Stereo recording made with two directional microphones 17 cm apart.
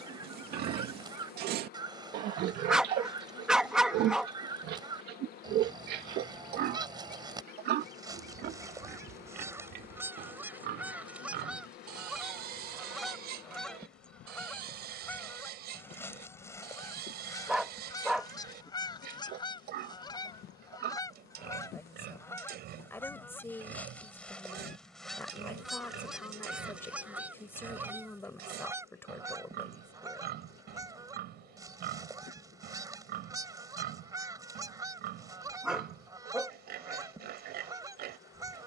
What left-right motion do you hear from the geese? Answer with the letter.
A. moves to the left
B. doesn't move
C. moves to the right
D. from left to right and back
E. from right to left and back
E.